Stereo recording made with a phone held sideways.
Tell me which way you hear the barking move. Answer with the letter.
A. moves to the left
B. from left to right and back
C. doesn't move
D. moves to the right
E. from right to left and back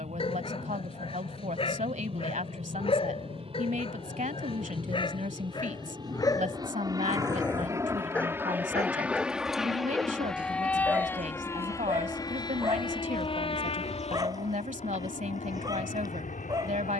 D.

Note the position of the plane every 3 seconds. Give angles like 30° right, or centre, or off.
50° right, 40° right, 20° right, 10° left, 40° left, 50° left.